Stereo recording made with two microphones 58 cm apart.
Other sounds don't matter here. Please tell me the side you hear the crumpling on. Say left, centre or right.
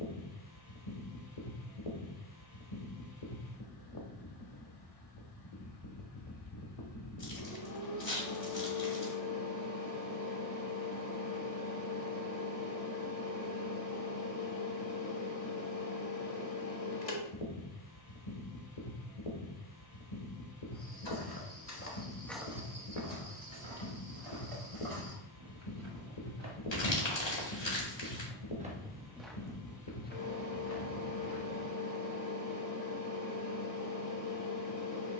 left.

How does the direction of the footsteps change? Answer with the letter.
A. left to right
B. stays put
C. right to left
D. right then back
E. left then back
D.